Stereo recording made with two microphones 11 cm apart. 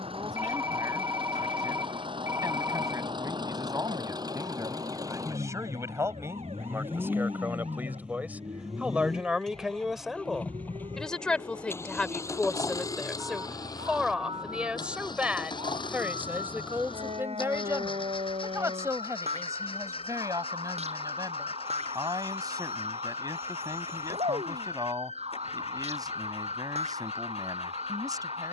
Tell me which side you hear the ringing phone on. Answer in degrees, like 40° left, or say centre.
30° right.